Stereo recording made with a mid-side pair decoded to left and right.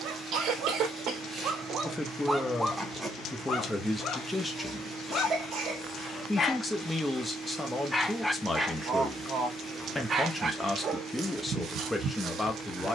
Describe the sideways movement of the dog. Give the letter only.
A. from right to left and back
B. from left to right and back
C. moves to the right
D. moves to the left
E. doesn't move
A.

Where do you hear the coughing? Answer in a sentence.
In this clip you hear the coughing on the right.